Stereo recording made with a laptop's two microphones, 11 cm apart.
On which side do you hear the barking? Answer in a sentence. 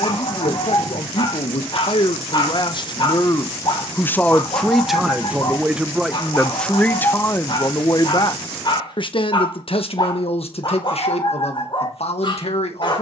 You can hear the barking on the left.